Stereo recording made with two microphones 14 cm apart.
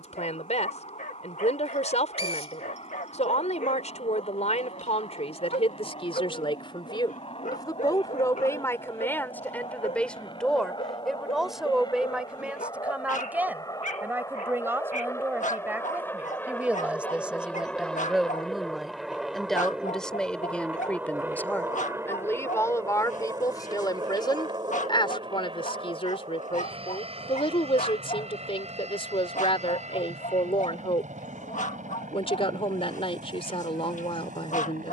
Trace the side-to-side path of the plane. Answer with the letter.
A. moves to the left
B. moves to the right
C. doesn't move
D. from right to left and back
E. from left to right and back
B.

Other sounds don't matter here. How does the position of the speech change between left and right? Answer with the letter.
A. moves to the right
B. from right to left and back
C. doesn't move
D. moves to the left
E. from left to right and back
E.